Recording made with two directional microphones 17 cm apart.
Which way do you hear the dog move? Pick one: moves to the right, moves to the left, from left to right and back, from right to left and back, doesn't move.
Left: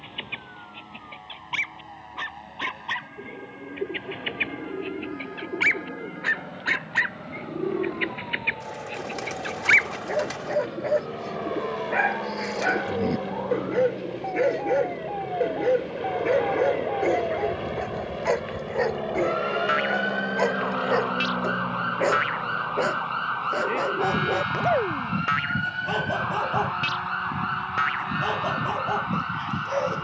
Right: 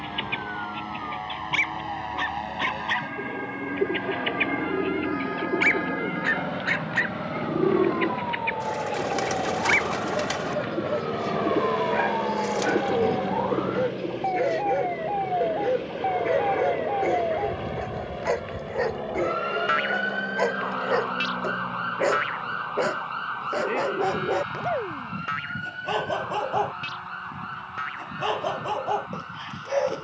from right to left and back.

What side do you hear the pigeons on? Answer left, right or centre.
right.